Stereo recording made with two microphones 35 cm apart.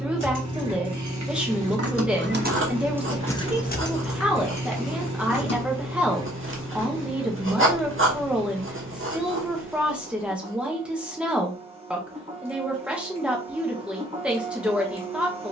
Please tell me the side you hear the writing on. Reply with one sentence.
You can hear the writing on the right.